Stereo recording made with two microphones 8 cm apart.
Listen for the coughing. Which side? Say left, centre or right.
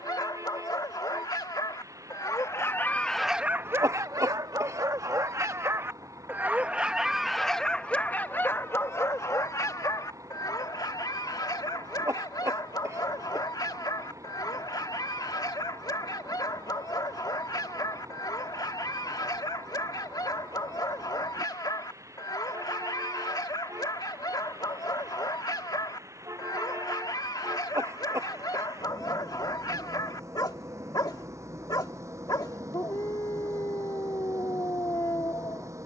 right.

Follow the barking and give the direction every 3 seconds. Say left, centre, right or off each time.
left, right, centre, left, left, left, left, left, left, left, left, left.